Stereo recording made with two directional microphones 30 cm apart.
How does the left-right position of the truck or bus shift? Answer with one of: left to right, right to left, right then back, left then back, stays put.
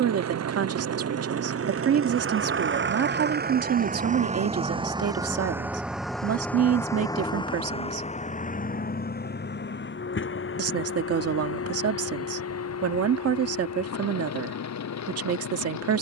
right to left.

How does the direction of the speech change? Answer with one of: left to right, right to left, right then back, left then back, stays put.
stays put.